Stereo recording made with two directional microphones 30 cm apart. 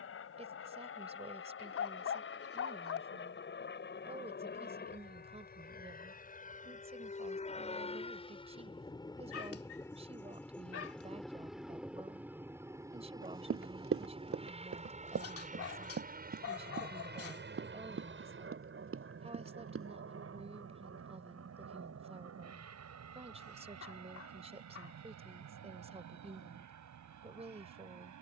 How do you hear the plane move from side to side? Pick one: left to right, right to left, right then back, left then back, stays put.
left to right.